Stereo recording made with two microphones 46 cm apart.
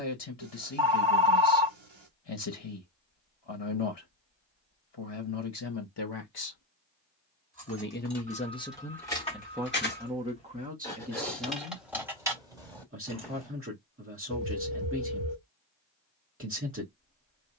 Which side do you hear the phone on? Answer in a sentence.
You can hear the phone on the right.